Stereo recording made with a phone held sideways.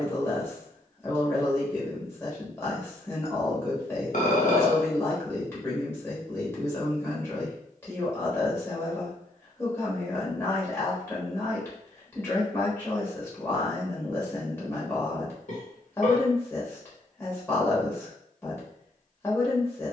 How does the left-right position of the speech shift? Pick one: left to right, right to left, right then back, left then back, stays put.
stays put.